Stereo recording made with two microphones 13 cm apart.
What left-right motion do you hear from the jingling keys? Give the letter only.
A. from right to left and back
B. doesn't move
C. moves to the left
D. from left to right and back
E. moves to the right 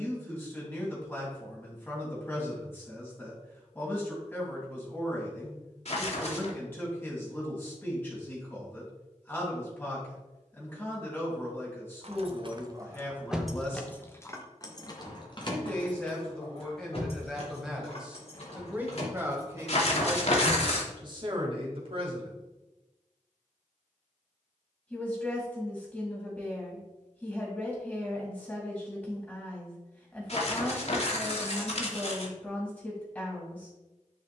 C.